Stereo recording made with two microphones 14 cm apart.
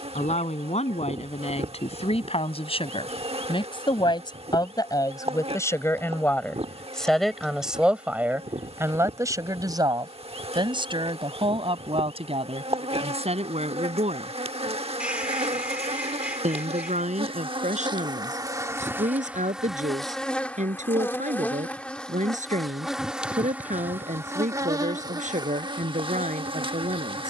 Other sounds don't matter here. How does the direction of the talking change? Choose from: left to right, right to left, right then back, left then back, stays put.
left to right.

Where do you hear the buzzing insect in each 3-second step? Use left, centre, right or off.
right, right, right, right, right, right, centre, centre, right.